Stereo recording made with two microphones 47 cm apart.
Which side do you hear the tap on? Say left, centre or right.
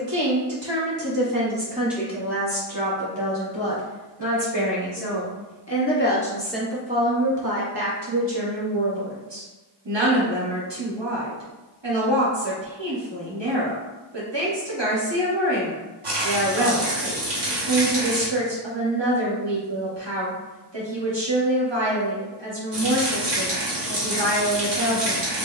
right.